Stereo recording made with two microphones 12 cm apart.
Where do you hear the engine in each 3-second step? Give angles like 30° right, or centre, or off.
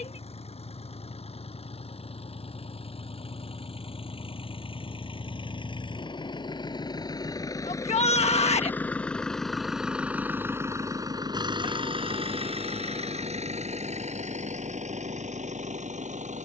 60° left, 50° left, 30° left, 20° right, 60° right, 80° right.